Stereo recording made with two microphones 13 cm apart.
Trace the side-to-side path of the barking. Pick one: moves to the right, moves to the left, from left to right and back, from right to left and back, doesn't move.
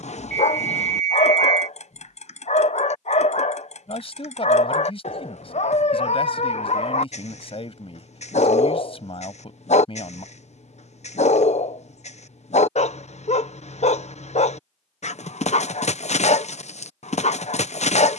doesn't move.